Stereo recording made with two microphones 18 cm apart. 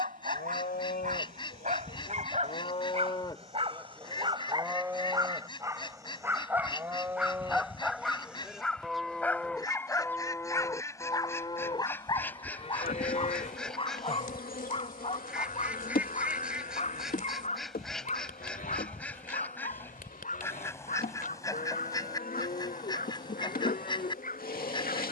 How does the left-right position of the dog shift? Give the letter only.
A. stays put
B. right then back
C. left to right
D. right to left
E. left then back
D.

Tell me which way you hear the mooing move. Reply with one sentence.
In this clip you hear the mooing go right and come back.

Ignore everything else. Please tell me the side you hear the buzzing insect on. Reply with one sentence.
In this clip you hear the buzzing insect on the left.